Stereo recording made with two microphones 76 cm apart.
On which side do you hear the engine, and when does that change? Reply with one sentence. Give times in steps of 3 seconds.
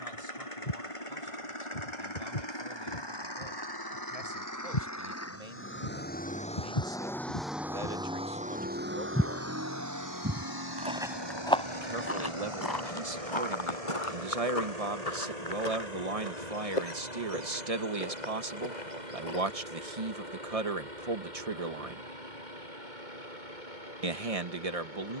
You can hear the engine on the left from 0 s, in the centre from 6 s and on the right from 9 s.